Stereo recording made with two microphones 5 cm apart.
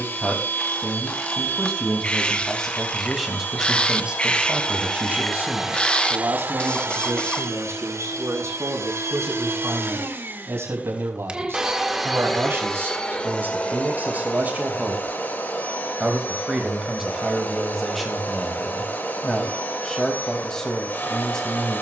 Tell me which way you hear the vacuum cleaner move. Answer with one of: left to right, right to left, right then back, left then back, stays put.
right then back.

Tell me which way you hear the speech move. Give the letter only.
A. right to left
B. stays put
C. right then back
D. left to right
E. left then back
C.